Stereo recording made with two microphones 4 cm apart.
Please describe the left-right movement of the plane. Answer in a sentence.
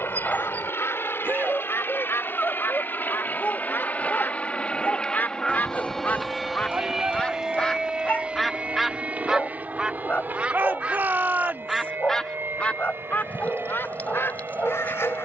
In this clip you hear the plane go from the left side to the right.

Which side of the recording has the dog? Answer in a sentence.
You can hear the dog on the left.